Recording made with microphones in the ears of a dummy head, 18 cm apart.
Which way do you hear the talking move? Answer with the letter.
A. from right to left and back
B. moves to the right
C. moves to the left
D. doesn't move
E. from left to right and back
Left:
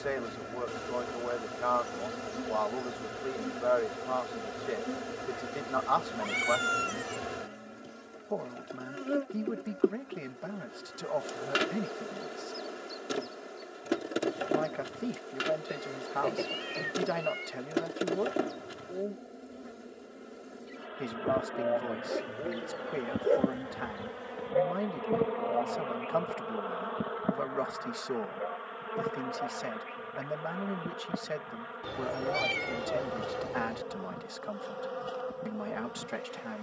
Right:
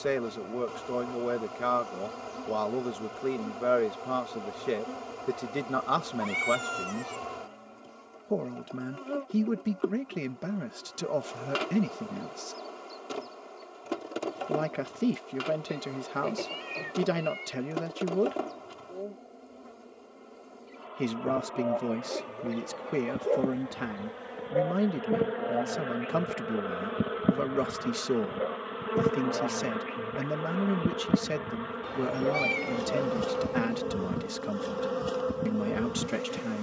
D.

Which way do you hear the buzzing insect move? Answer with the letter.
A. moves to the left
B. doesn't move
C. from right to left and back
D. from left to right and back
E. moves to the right
E.